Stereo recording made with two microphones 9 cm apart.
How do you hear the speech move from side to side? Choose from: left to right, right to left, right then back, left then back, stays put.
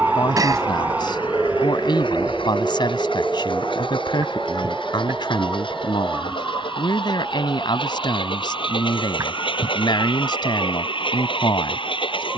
stays put.